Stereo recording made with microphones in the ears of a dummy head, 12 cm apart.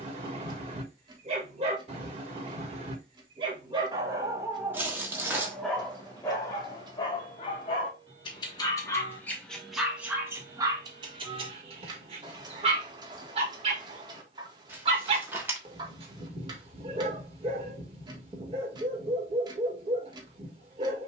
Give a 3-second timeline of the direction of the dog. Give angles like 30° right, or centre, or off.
50° right, 10° right, 30° left, 20° right, 40° right, 40° right, 40° right.